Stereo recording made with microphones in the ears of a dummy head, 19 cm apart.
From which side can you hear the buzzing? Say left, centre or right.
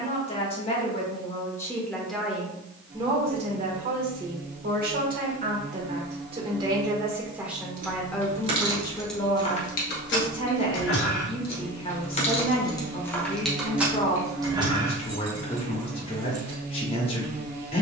right.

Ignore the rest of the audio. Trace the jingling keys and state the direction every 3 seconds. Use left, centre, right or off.
off, off, right, left, centre, right.